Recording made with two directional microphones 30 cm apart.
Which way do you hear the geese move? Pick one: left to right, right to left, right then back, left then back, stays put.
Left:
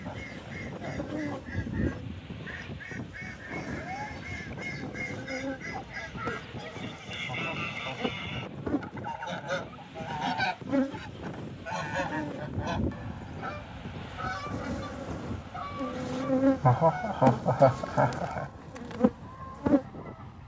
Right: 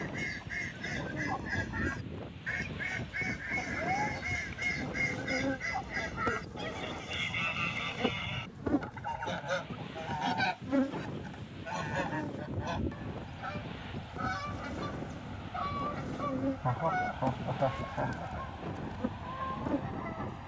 left then back.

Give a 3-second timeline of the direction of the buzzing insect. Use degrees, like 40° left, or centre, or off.
50° left, centre, 10° right, 10° left, 30° left, 50° left, 60° left.